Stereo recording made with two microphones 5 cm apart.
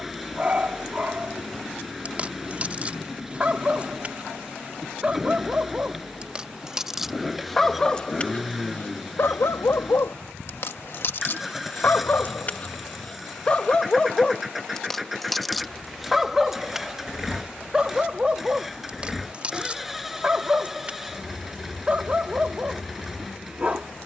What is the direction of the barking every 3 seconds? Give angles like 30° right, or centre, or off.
30° right, 30° right, centre, 50° left, 20° left, 10° right, 30° right, 30° right.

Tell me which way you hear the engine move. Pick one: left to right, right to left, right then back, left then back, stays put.
stays put.